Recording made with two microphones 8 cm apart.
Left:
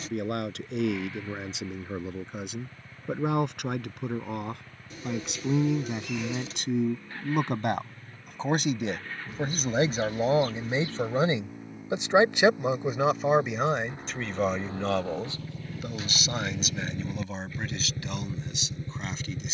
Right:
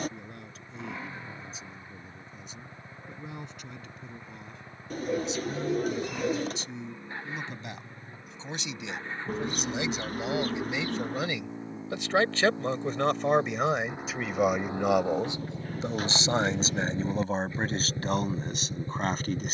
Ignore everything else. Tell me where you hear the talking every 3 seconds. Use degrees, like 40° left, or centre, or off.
80° left, 70° left, 60° left, 40° left, centre, 30° right, 40° right.